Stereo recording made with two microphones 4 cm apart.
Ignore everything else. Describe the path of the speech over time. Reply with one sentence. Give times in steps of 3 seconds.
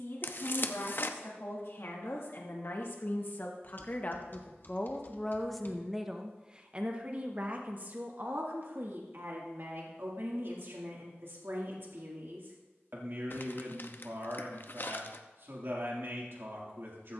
In this clip you hear the speech on the left from 0 s and on the right from 6 s.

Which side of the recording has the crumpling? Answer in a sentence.
In this clip you hear the crumpling on the left.